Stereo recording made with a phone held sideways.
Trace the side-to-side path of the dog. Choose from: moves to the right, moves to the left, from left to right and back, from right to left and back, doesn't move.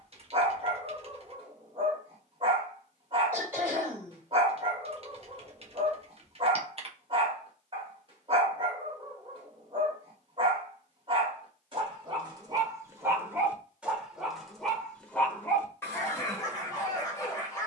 moves to the left.